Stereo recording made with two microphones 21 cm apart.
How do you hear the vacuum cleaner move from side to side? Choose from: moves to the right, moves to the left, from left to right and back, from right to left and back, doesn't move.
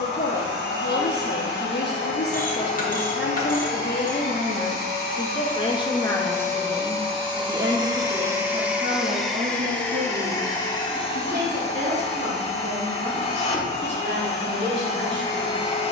moves to the left.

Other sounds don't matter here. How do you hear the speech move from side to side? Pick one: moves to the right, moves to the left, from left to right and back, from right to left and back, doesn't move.
moves to the right.